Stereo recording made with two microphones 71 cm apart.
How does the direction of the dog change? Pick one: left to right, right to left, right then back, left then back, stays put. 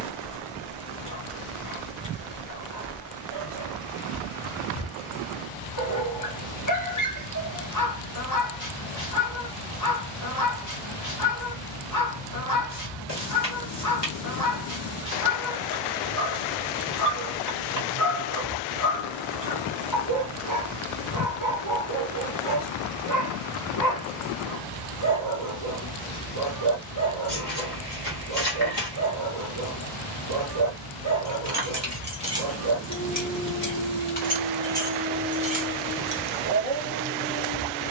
stays put.